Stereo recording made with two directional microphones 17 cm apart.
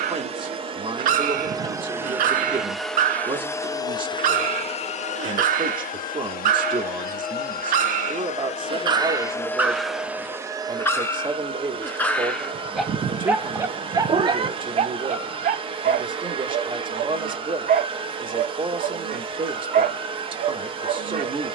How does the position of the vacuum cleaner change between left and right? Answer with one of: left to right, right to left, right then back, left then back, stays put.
left then back.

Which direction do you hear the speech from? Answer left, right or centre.
right.